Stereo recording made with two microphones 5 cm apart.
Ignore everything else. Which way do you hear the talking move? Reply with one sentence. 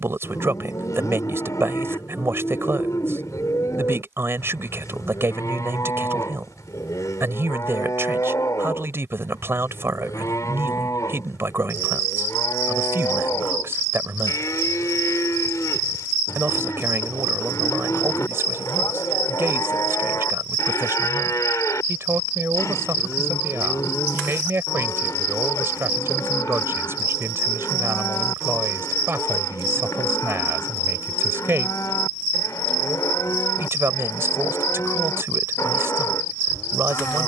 You can hear the talking stay put.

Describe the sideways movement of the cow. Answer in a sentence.
You can hear the cow stay in one place.